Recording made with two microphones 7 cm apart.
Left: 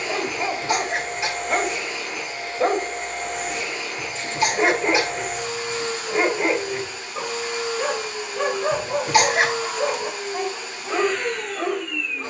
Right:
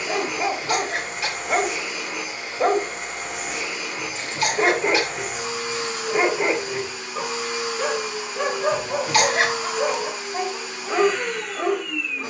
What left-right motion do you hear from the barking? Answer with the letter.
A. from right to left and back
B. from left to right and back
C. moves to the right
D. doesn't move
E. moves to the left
D.